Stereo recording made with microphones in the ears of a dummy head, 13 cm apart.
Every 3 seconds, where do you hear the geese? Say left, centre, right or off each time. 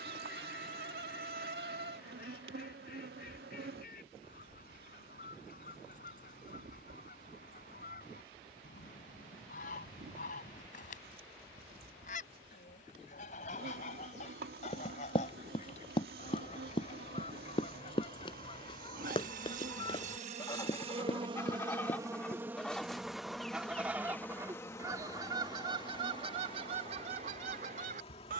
left, left, left, left, left, left, left, centre, right, right.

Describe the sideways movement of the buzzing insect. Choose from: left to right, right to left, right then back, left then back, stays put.
right to left.